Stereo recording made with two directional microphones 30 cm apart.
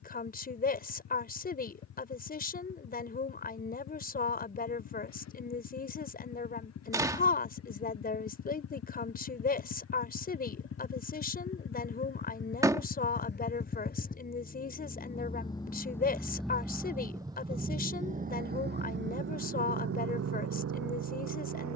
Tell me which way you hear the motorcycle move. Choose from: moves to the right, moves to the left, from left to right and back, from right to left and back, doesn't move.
moves to the right.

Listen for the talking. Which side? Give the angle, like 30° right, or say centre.
30° left.